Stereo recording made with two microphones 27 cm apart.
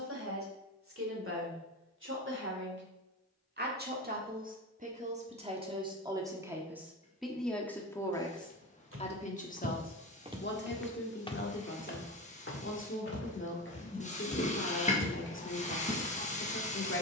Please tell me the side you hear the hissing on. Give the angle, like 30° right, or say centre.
30° left.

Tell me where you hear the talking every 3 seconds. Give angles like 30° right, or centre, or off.
50° right, 30° right, centre, 40° left, 50° left, 50° left.